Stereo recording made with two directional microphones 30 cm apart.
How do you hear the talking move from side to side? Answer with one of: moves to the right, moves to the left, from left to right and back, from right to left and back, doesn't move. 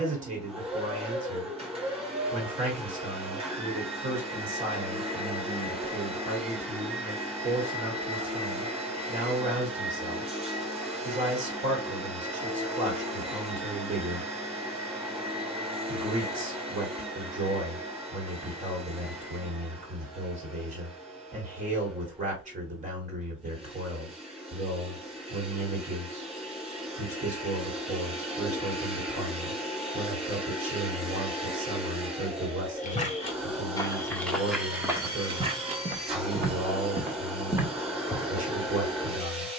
doesn't move.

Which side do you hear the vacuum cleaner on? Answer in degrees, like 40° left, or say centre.
20° right.